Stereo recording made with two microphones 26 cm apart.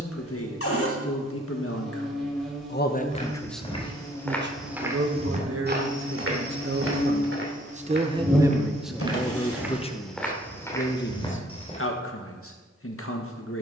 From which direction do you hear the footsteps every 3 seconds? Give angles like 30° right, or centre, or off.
off, centre, 40° right, centre, off.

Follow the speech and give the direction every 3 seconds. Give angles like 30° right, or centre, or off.
50° left, 30° right, 30° right, 30° left, 50° left.